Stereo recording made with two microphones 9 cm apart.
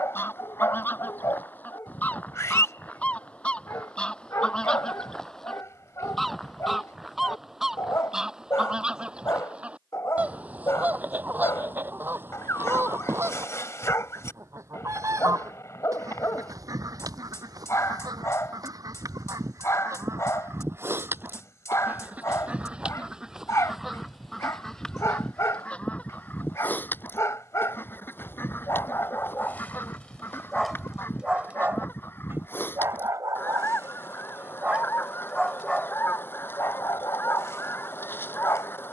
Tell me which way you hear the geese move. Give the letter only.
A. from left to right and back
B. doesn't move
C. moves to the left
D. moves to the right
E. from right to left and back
A.